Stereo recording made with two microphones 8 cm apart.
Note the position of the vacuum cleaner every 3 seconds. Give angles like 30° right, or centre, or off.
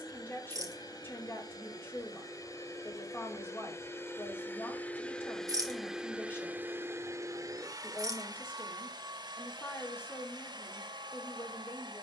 50° left, 20° left, 40° right, 70° right.